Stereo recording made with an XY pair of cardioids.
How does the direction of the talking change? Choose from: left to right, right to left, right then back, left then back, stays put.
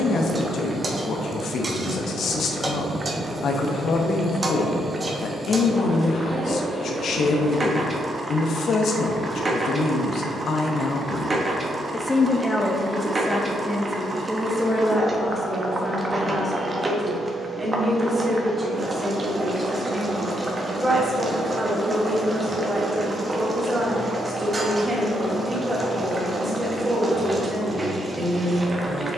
left to right.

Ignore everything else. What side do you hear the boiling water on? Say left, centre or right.
right.